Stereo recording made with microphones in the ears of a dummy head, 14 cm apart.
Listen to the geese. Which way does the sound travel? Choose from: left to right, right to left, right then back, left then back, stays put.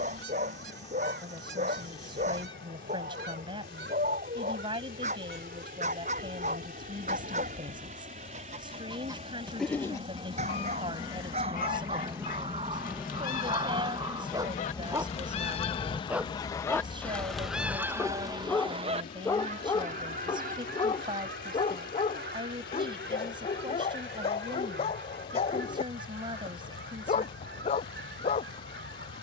left then back.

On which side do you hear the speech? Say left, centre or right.
right.